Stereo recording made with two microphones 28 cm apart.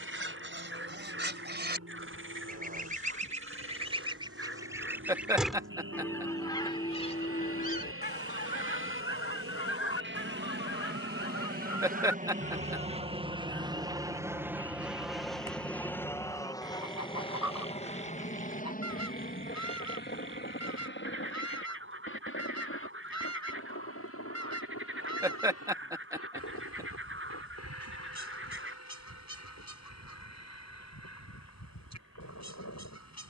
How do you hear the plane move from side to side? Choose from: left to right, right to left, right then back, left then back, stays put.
right to left.